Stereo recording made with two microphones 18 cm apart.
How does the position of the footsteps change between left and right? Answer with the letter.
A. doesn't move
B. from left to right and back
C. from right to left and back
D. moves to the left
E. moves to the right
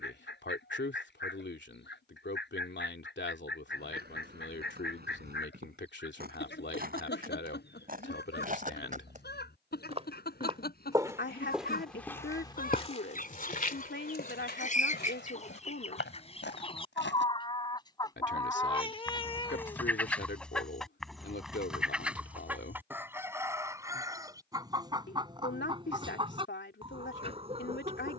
D.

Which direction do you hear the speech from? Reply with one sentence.
You can hear the speech on the left.